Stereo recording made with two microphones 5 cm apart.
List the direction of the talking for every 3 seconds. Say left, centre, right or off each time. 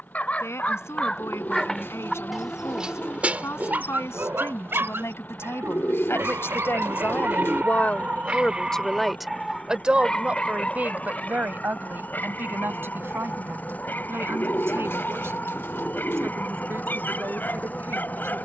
left, left, left, right, right, right.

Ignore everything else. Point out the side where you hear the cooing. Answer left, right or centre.
left.